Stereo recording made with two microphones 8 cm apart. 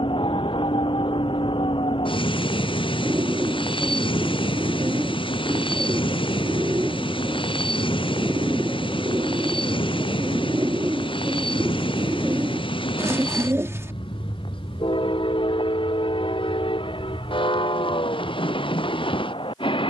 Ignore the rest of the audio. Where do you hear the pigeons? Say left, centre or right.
right.